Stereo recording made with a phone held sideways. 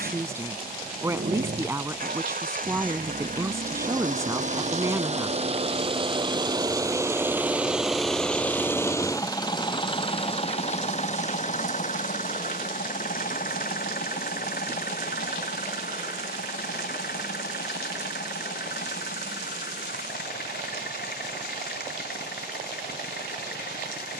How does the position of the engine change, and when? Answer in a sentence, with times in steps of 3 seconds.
In this clip you hear the engine on the right from 0 s, in the centre from 6 s and on the left from 9 s.